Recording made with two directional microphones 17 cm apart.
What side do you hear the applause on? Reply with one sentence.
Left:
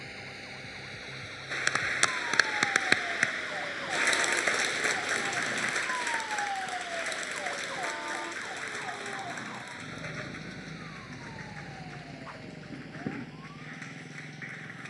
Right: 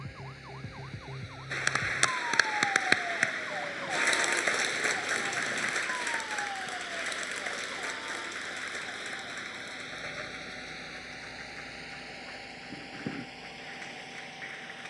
In this clip you hear the applause in the centre.